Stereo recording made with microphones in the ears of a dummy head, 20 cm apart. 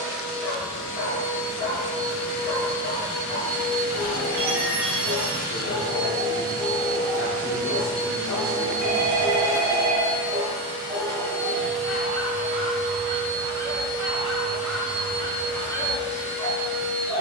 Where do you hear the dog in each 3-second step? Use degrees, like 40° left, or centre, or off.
30° left, 30° left, 30° left, 30° right, 10° right, 10° left.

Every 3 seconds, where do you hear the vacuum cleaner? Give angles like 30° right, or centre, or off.
70° left, 70° left, 70° left, 30° left, 10° left, 60° left.